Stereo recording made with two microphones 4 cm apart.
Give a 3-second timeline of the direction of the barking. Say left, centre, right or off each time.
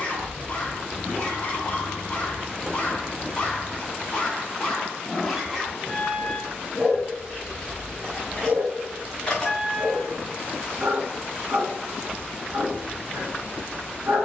left, centre, right, right, right.